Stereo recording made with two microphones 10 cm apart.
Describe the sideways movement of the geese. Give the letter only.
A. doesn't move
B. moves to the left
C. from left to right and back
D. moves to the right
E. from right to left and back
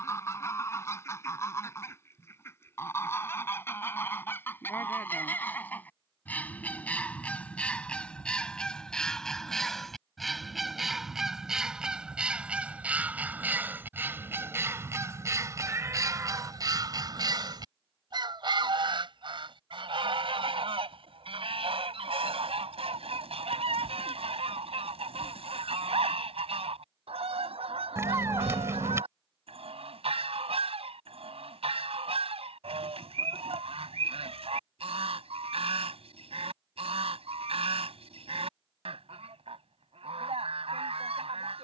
D.